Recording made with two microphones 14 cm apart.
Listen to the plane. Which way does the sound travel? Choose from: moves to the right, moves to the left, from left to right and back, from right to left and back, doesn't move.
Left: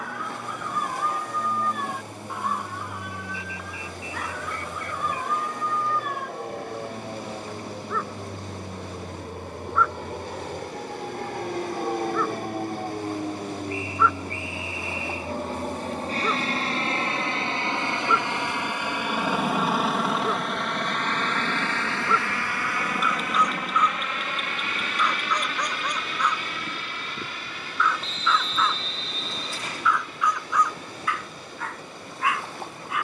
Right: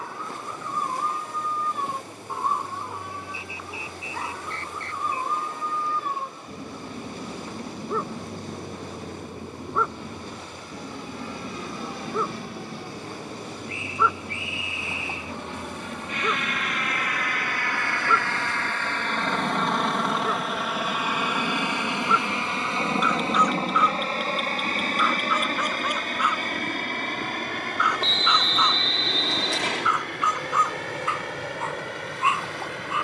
moves to the right.